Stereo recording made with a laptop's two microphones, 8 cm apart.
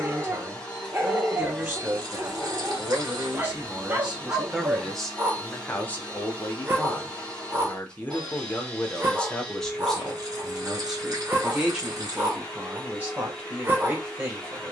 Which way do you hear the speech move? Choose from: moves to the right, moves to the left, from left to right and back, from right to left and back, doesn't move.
from right to left and back.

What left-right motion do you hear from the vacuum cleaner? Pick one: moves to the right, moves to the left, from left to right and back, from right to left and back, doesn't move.
doesn't move.